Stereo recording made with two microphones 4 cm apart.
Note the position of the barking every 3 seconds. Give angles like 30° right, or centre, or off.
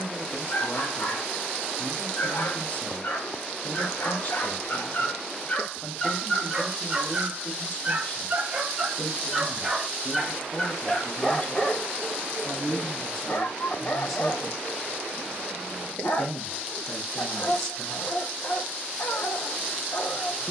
70° left, 50° left, 10° right, 10° left, 50° left, 60° left, 60° left.